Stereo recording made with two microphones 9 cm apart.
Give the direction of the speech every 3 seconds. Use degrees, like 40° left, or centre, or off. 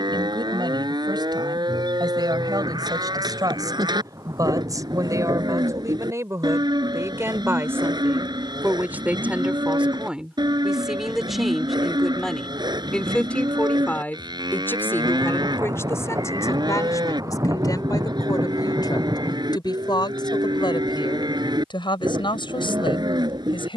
50° right, 40° right, 20° right, 10° right, 10° left, 30° left, 50° left, 60° left.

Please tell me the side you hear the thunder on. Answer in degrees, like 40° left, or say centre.
40° right.